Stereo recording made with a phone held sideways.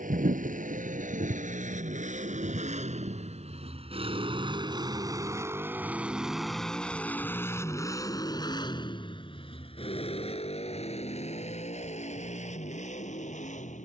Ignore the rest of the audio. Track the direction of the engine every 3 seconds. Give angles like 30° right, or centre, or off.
60° right, 30° right, 20° left, 50° left, 60° left.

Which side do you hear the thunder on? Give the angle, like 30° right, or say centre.
70° right.